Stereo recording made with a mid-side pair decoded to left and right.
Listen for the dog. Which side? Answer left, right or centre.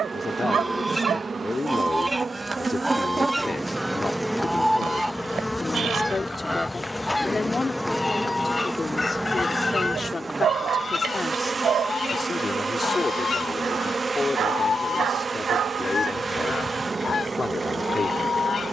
right.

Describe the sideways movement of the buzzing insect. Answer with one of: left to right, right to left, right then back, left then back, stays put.
left then back.